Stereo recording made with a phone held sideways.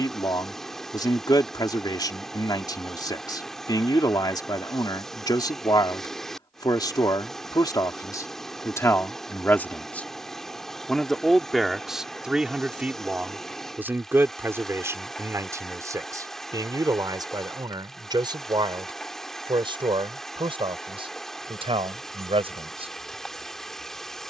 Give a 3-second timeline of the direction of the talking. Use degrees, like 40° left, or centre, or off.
30° left, 30° left, 20° left, 10° left, 10° right, 20° right, 30° right, 40° right.